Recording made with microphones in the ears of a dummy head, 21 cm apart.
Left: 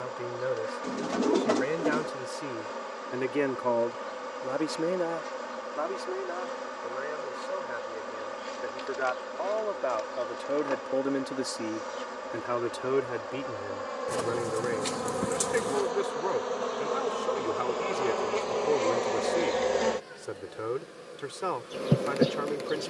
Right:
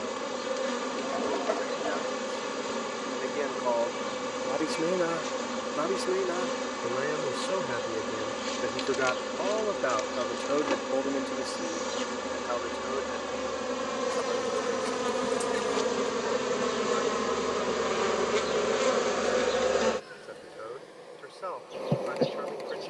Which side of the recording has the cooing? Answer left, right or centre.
left.